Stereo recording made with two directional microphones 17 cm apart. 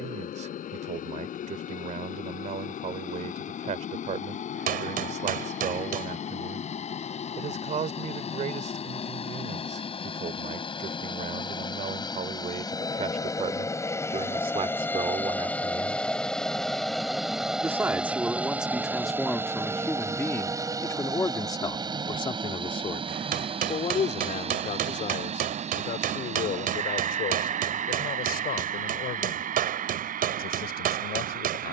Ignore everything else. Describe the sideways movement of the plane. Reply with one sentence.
In this clip you hear the plane move to the right.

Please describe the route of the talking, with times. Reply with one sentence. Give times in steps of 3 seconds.
You can hear the talking on the right from 0 s, in the centre from 18 s and on the left from 21 s.